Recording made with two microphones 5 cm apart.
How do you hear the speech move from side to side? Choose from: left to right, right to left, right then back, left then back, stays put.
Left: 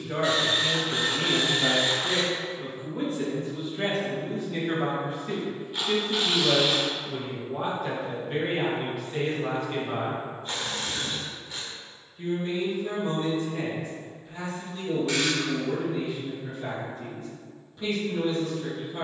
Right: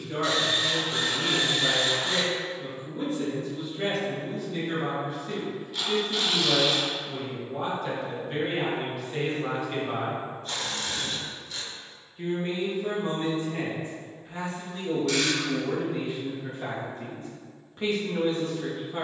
left to right.